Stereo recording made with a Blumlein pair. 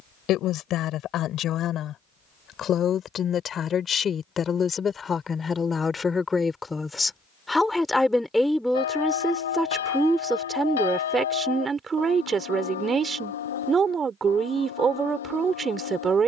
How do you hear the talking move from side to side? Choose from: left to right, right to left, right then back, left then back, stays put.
left to right.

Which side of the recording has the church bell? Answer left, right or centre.
left.